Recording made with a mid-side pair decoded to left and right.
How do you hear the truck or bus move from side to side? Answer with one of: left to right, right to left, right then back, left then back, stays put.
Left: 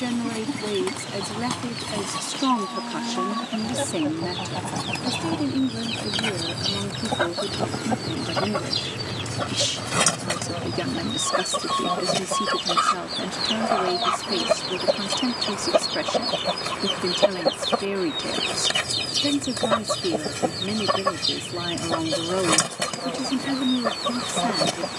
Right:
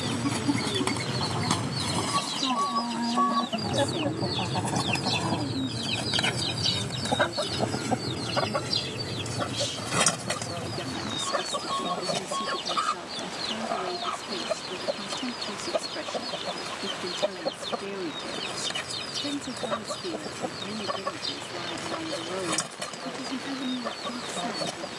right to left.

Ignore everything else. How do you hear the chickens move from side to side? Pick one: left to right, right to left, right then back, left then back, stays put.
right to left.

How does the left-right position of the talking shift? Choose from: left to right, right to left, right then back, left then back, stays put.
stays put.